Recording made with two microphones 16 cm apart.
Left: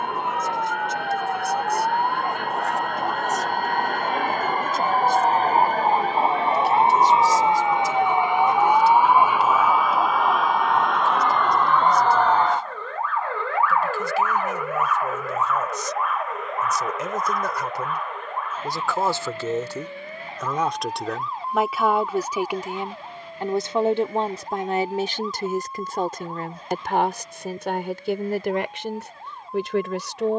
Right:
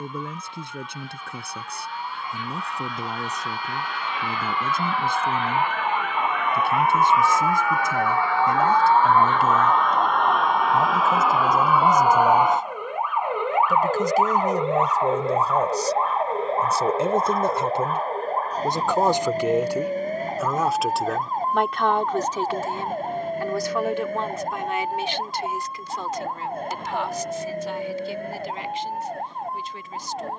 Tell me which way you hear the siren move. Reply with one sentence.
You can hear the siren move from left to right.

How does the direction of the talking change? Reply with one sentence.
In this clip you hear the talking move to the left.